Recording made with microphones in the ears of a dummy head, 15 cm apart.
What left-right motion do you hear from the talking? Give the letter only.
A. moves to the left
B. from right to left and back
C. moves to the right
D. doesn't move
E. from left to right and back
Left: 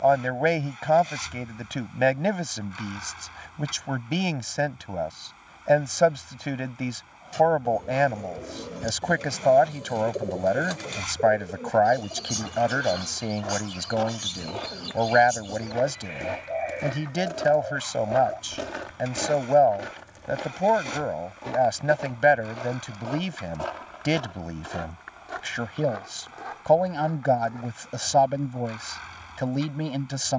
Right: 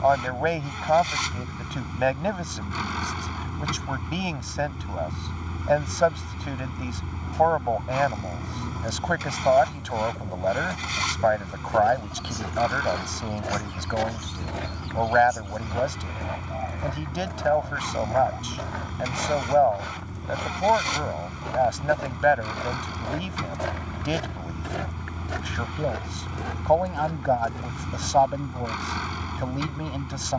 D.